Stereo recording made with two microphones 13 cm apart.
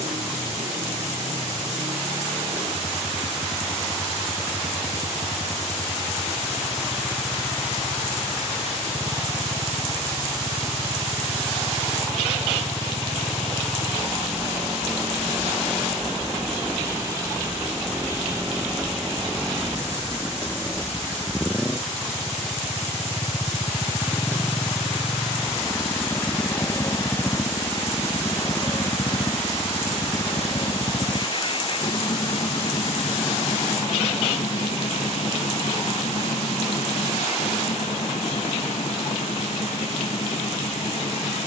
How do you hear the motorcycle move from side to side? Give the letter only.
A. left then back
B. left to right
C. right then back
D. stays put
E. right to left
E.